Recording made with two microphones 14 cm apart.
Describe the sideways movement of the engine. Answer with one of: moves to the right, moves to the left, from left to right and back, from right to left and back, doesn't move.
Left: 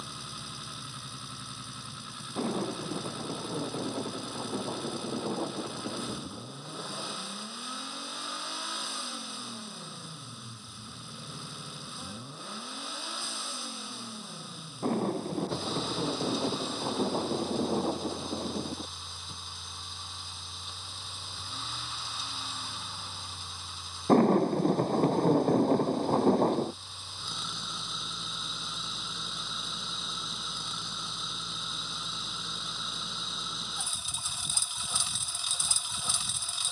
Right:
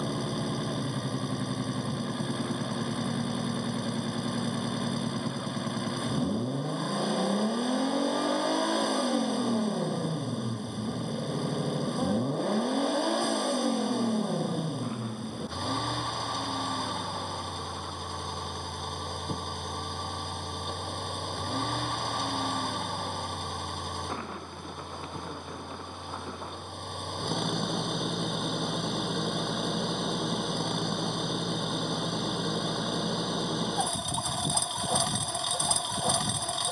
doesn't move.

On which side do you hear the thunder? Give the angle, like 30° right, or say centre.
50° left.